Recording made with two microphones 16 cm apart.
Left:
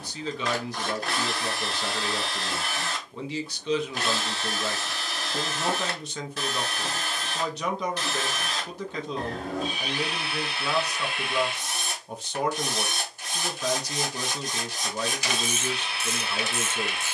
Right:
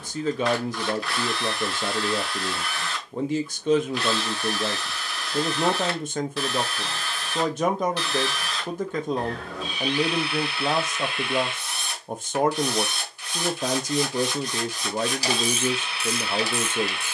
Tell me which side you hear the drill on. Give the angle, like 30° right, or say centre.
40° left.